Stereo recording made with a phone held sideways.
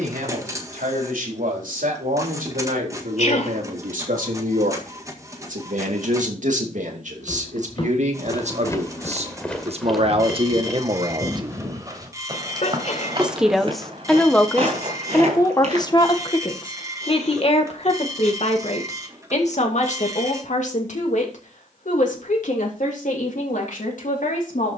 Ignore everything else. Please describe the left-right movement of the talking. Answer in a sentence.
You can hear the talking travel towards the left.